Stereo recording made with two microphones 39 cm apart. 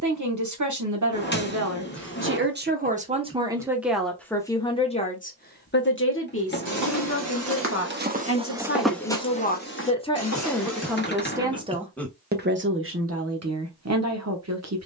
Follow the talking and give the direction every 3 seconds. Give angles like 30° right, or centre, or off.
40° right, 10° left, 40° left, 10° left, 40° right.